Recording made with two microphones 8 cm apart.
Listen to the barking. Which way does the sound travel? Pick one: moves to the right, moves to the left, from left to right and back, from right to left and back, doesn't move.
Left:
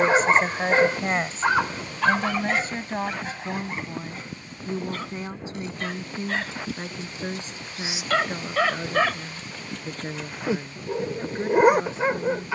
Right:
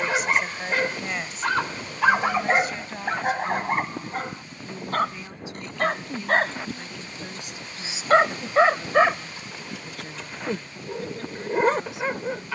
from left to right and back.